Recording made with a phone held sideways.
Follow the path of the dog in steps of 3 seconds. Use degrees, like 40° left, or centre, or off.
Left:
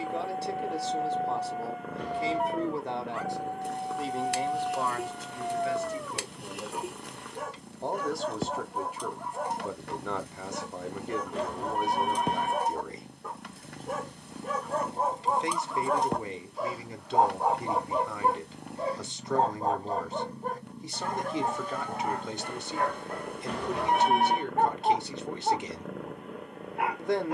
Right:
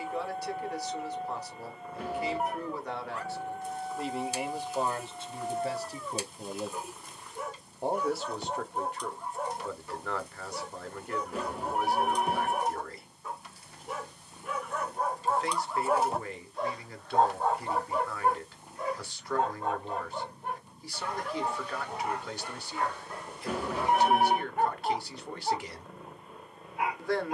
60° left, 60° left, 60° left, 60° left, 50° left, 10° left, 40° left, 50° left, 60° left.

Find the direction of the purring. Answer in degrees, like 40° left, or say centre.
70° left.